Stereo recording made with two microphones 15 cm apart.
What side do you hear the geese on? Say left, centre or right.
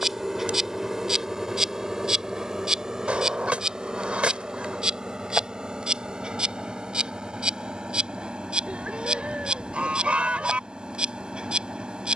centre.